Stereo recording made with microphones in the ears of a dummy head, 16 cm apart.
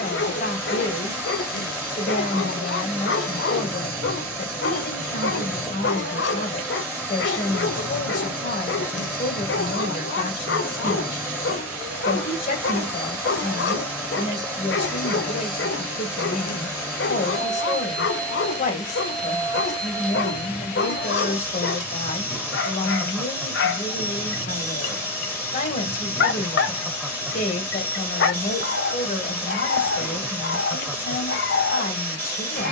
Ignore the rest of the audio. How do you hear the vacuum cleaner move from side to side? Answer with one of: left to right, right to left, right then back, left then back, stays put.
stays put.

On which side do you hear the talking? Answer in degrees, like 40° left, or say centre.
40° left.